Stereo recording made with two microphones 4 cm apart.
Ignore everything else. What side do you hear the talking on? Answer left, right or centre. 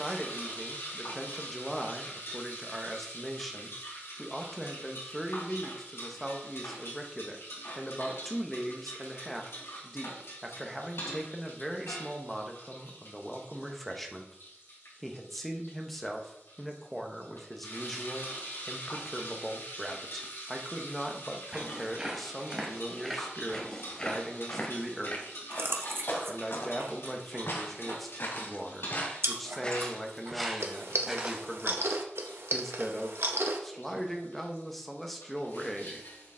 centre.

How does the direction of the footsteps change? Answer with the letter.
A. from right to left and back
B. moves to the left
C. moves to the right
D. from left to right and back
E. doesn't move
A.